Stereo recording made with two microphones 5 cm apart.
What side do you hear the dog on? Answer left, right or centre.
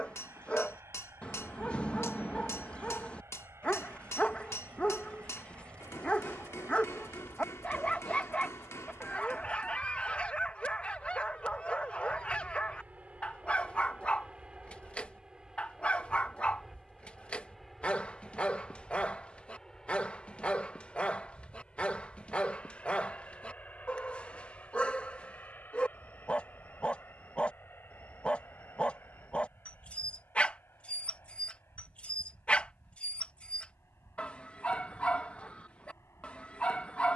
left.